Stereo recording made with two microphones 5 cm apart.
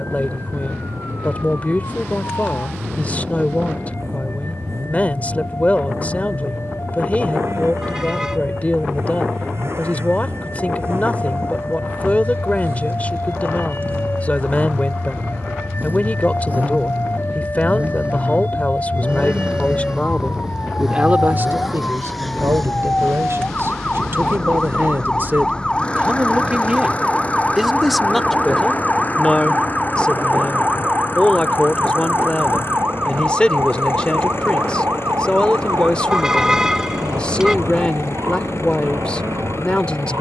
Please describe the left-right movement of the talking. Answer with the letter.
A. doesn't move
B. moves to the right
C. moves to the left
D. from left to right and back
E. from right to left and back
D.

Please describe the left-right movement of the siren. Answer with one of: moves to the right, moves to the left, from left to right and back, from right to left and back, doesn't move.
moves to the right.